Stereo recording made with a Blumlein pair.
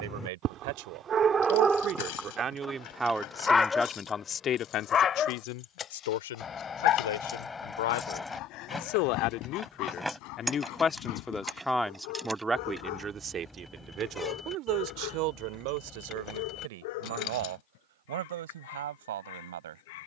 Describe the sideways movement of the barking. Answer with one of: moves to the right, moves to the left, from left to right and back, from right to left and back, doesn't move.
moves to the left.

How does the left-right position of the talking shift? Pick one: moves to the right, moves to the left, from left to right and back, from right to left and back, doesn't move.
from right to left and back.